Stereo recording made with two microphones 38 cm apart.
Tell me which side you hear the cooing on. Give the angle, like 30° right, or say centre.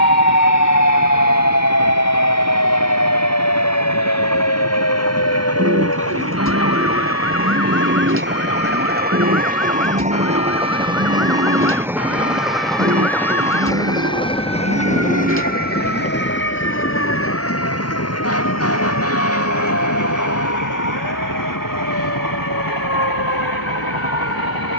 30° right.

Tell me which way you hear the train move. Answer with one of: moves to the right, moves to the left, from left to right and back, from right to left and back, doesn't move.
moves to the left.